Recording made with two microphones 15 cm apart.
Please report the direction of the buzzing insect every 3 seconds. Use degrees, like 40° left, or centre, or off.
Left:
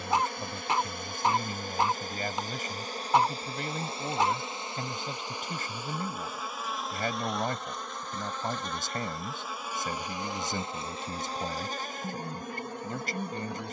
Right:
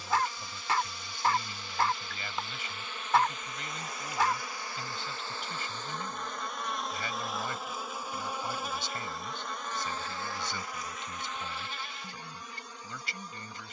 50° left, 20° left, centre, 20° left, 60° left.